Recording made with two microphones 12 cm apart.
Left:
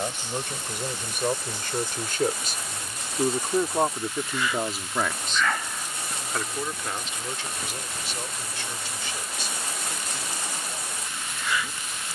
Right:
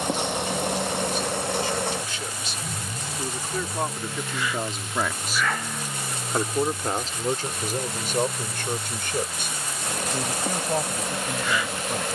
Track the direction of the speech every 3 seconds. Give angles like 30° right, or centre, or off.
60° left, 20° left, 40° right, 60° right.